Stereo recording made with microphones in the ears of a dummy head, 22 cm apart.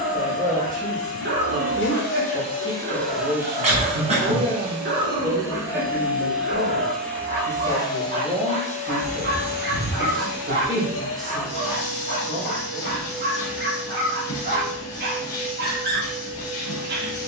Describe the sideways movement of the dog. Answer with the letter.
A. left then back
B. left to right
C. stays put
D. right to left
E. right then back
C.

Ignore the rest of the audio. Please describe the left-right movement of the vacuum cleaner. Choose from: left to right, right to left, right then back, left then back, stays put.
right then back.